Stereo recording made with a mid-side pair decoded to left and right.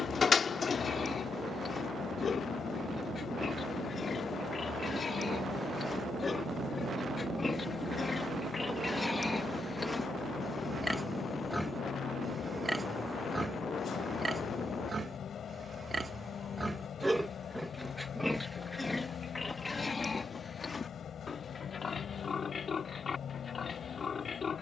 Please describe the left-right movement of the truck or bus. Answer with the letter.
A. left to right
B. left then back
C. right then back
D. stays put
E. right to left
D.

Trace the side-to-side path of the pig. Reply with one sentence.
You can hear the pig go right and come back.